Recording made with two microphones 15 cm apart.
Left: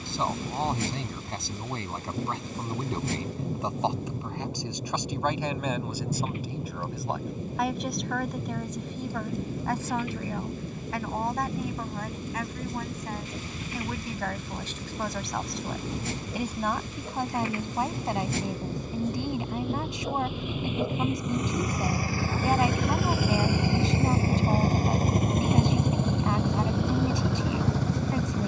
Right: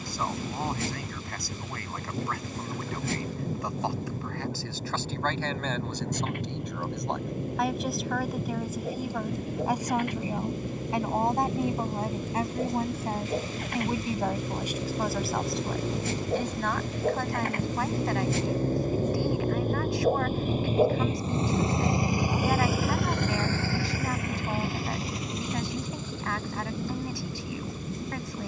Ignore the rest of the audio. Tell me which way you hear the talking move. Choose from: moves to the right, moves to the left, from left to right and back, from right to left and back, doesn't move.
from left to right and back.